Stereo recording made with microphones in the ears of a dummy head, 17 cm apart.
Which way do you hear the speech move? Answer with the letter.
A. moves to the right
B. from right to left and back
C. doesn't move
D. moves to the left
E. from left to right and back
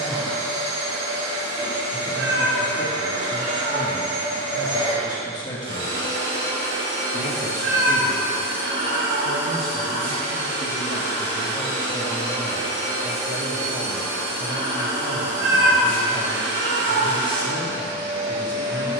B.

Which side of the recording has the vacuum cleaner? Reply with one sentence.
In this clip you hear the vacuum cleaner on the right.